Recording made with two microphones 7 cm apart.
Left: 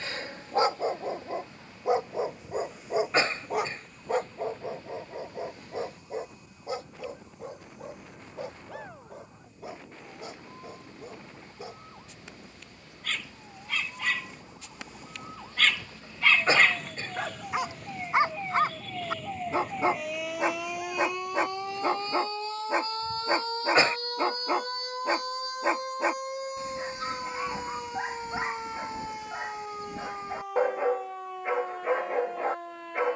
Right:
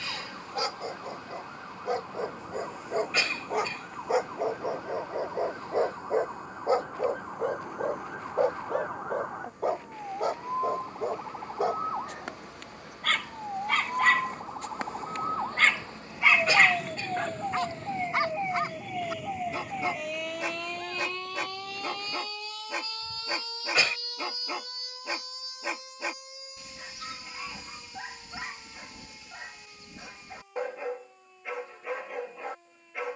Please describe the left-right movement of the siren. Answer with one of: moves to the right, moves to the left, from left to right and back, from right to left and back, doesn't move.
moves to the left.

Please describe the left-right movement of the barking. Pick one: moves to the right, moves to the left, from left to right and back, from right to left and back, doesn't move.
from left to right and back.